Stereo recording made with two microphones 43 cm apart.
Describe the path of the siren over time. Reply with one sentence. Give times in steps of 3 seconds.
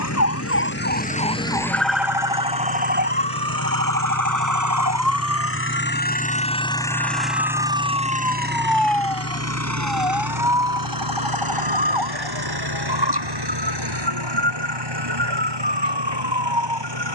In this clip you hear the siren in the centre from 0 s and on the right from 3 s.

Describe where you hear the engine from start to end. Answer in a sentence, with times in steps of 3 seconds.
In this clip you hear the engine on the left from 0 s, in the centre from 6 s and on the right from 9 s.